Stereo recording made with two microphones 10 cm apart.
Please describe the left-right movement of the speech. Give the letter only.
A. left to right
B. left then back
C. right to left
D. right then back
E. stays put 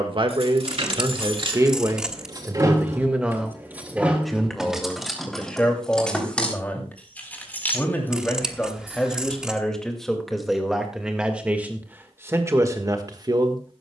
B.